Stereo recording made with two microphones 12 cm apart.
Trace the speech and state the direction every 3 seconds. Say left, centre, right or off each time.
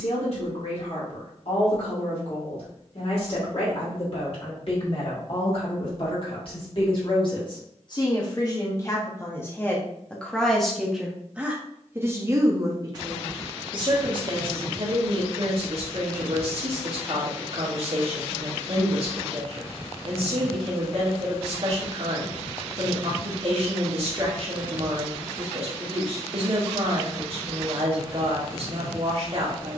left, left, left, centre, right, right, right, right, right, right.